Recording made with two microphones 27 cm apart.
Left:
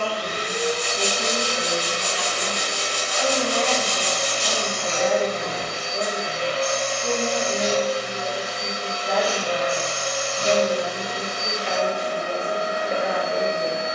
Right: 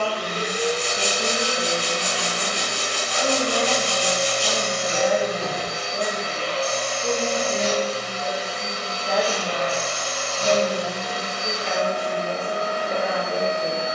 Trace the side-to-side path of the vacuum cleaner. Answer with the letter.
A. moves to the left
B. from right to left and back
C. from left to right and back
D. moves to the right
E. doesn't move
A.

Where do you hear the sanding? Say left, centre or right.
right.